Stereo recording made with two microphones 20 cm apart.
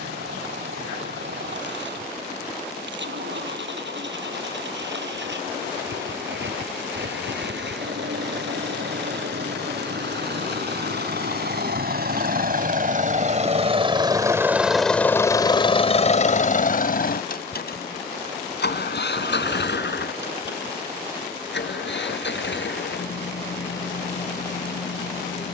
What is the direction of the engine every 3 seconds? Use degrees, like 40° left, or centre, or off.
80° right, 80° right, 80° right, 70° right, 30° right, 40° left, 70° left, 80° left, 80° left.